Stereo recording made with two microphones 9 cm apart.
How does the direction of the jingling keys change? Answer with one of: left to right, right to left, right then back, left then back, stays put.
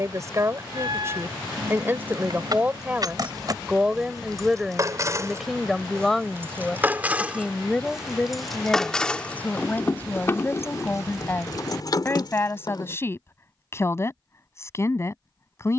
right to left.